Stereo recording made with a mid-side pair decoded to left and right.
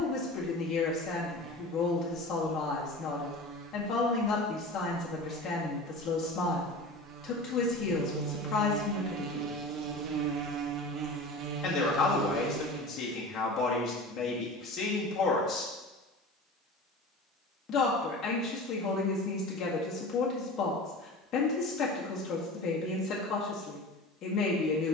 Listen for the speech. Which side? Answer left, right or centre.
left.